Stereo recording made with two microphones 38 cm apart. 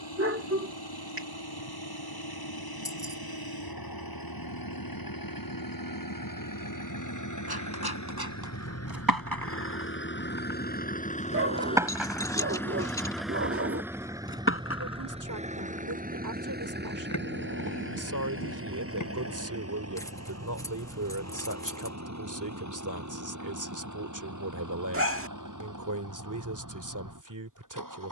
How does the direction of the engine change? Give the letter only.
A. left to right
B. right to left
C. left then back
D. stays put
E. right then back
A.